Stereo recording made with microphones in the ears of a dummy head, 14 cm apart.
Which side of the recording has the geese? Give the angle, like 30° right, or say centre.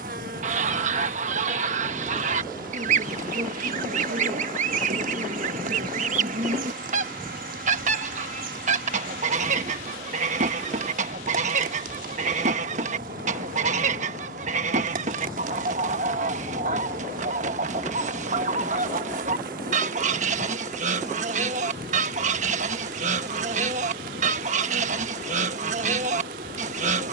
50° right.